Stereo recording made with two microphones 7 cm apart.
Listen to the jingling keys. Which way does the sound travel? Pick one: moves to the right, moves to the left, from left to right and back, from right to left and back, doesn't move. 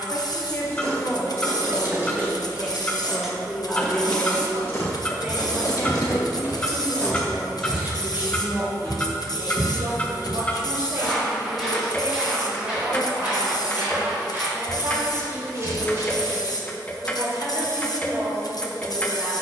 from right to left and back.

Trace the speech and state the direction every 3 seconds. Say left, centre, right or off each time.
left, centre, right, right, right, right, right.